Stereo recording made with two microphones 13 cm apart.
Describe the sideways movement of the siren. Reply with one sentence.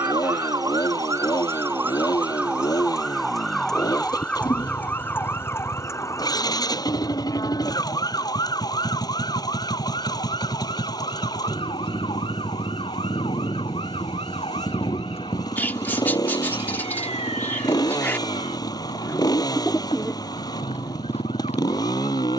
In this clip you hear the siren move from right to left.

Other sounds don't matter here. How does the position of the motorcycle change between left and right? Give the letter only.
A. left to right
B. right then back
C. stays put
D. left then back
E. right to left
C.